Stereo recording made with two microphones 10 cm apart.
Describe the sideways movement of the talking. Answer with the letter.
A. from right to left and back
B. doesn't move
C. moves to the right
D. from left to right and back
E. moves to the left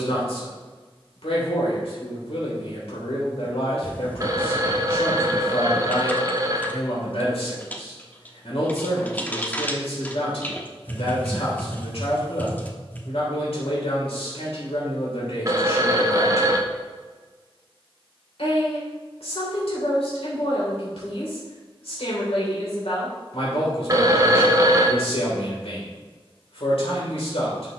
B.